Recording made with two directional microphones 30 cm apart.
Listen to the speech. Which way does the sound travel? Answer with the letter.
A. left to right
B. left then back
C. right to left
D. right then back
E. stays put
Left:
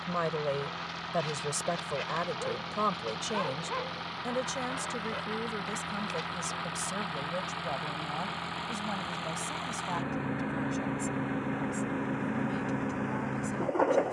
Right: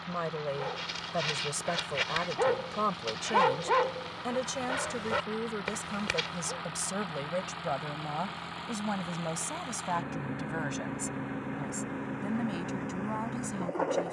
A.